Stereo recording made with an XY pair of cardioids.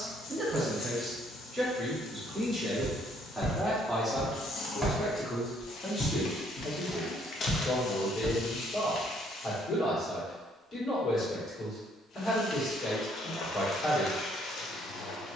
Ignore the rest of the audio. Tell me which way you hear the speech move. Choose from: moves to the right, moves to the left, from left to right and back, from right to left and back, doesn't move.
moves to the left.